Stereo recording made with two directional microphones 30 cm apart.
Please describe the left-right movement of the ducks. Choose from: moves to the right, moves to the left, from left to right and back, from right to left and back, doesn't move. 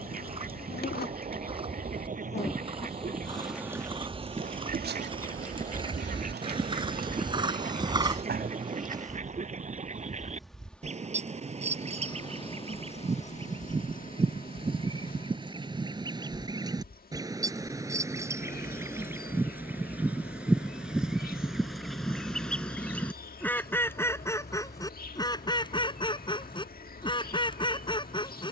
moves to the left.